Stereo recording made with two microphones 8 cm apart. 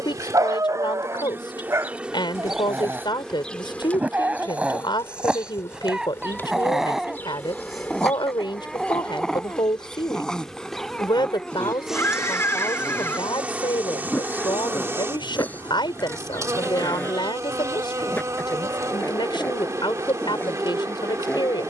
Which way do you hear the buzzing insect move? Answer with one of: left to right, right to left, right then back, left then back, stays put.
left then back.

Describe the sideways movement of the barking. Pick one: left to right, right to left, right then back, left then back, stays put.
right to left.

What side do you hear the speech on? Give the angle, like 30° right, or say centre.
60° left.